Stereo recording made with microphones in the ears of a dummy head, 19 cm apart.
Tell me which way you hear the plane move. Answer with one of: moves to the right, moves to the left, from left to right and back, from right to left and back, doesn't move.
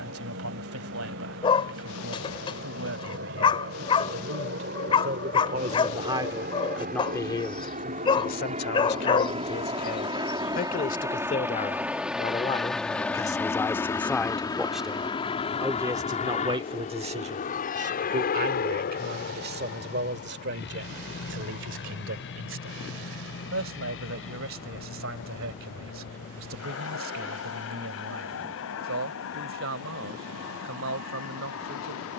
moves to the left.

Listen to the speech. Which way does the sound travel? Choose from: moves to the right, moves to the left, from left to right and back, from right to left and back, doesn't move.
from right to left and back.